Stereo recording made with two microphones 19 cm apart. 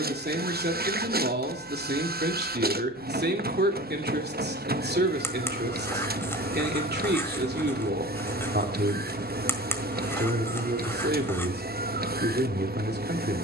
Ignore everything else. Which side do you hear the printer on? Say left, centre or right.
right.